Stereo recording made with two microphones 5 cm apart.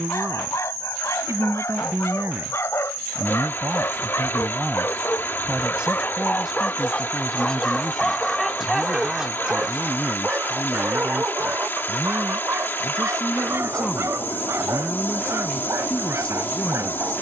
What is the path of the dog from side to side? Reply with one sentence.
You can hear the dog travel towards the right.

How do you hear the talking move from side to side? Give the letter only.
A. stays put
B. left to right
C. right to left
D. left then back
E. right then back
C.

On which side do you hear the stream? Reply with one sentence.
In this clip you hear the stream on the left.